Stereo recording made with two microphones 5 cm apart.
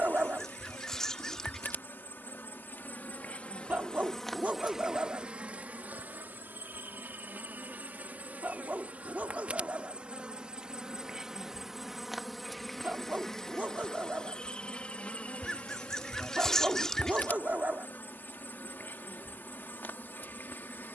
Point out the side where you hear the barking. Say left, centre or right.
right.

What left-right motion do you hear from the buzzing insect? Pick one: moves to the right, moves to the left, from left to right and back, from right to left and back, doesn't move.
from left to right and back.